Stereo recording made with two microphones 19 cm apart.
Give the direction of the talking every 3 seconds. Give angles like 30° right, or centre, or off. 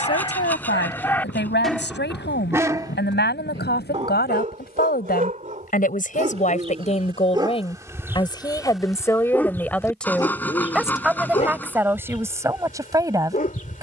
70° left, 60° left, 30° left, centre, 20° right.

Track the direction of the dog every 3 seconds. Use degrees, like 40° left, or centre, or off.
10° left, 40° right, 20° right, 20° left, 40° left.